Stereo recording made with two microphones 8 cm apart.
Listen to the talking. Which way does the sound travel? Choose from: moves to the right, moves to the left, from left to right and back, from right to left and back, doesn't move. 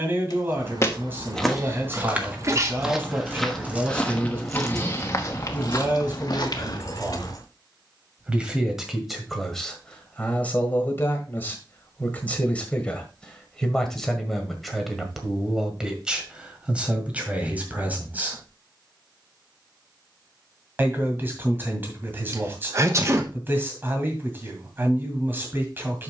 from right to left and back.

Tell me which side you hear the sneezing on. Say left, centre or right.
right.